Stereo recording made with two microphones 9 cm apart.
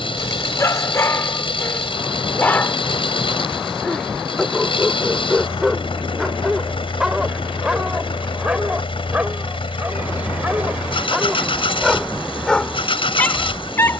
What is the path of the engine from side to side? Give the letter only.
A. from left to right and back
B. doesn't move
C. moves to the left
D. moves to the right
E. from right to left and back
B.